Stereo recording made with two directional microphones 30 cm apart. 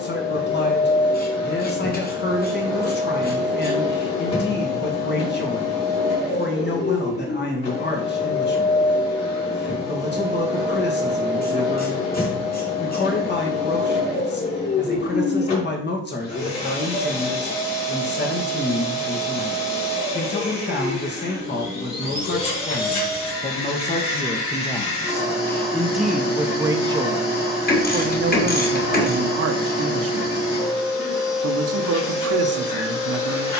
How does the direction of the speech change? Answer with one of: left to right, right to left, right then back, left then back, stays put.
left to right.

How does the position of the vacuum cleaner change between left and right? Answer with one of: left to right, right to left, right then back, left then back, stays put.
stays put.